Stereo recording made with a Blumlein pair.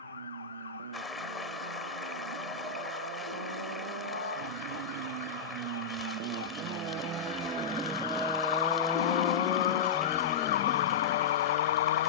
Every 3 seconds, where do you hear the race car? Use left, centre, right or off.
right, right, right, left.